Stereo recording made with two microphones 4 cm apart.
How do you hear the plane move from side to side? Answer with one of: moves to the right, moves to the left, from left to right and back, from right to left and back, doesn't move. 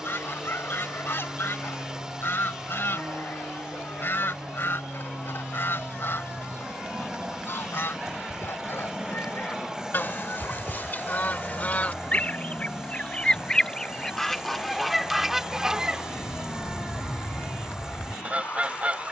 moves to the left.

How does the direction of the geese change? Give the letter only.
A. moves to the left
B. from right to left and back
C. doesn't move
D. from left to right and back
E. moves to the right
E.